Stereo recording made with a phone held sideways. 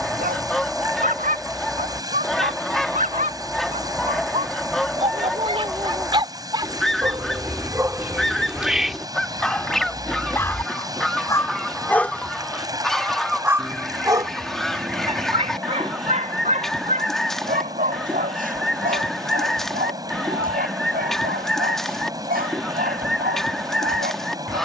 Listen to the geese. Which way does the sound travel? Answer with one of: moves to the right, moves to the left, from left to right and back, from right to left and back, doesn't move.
doesn't move.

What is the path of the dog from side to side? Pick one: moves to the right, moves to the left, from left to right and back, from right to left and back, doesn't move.
from right to left and back.